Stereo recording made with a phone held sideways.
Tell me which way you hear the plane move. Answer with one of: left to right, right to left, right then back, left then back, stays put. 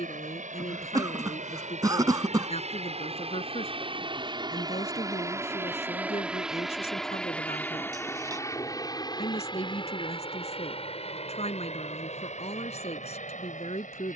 right to left.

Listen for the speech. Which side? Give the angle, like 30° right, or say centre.
50° left.